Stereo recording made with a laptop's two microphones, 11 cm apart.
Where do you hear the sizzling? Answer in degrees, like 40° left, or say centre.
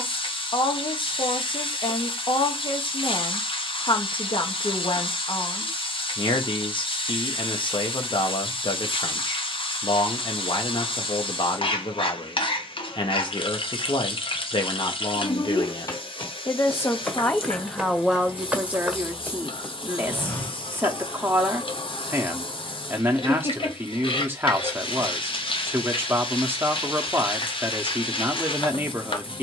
60° left.